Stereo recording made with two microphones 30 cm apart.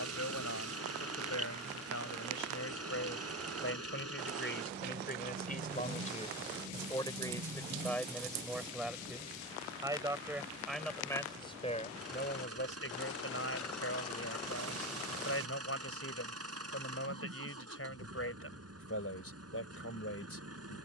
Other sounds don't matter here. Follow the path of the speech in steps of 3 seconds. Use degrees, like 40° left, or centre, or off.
60° left, 40° left, 10° left, centre, 50° left, 50° left, 50° left.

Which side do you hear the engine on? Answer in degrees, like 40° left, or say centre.
50° right.